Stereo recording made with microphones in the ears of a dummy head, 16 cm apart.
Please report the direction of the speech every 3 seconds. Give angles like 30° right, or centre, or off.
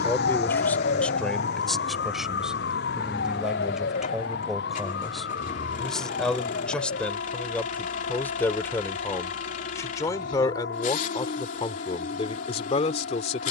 centre, centre, 10° left, 20° left, 30° left.